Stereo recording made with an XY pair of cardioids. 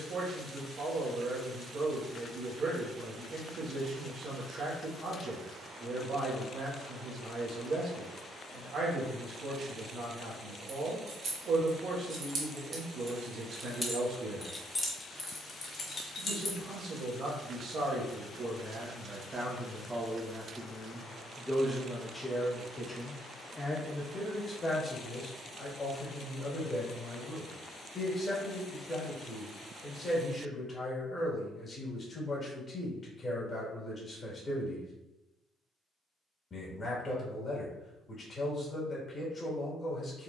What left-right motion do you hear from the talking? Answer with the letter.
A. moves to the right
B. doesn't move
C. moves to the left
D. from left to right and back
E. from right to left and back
C.